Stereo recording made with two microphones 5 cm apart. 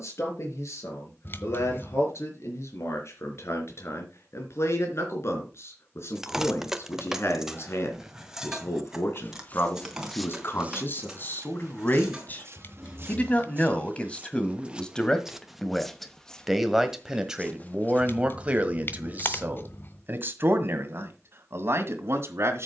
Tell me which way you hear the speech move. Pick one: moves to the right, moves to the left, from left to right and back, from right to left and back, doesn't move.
moves to the right.